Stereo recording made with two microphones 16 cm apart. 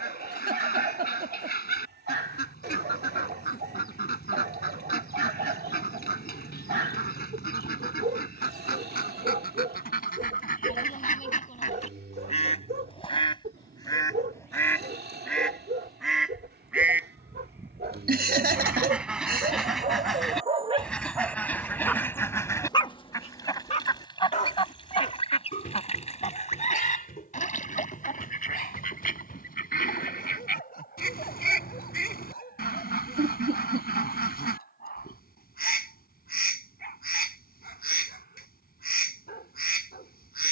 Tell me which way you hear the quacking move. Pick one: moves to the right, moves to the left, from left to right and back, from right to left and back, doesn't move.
from left to right and back.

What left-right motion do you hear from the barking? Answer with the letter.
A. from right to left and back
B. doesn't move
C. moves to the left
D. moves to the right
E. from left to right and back
C.